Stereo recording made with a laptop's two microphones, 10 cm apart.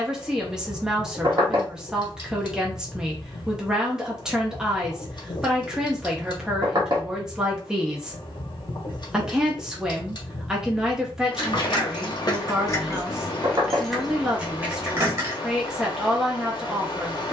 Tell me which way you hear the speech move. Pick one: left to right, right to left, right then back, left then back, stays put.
stays put.